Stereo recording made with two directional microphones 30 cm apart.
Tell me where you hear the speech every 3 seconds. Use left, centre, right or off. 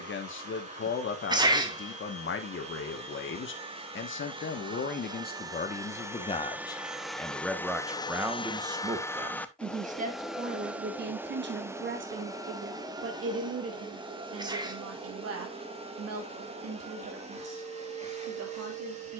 left, left, centre, right, right, right, right.